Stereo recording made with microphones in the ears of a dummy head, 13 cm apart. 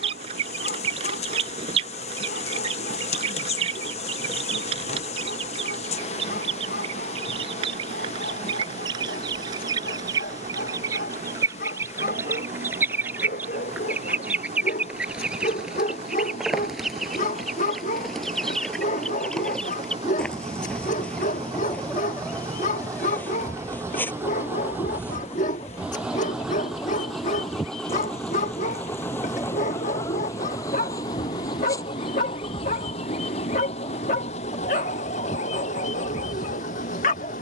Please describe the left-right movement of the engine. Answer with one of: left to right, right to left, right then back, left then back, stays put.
right to left.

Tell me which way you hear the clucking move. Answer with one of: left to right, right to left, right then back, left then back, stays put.
right to left.